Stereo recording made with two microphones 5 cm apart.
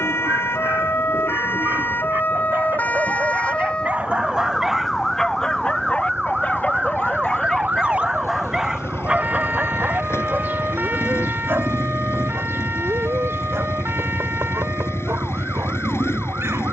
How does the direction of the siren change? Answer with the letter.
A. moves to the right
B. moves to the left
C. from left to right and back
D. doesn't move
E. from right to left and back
A.